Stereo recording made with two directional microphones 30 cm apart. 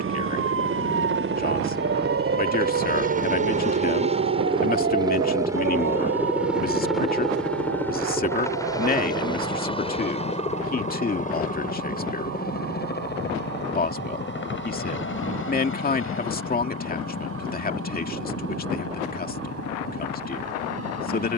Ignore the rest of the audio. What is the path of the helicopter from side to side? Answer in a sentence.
You can hear the helicopter travel towards the left.